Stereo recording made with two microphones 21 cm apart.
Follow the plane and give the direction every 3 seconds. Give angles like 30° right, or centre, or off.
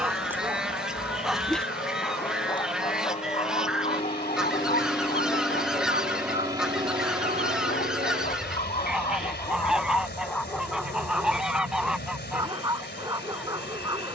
50° left, 20° left, 30° right, 70° right, 70° right.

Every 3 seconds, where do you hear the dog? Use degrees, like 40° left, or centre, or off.
centre, 40° left, 40° left, 10° left, 20° right.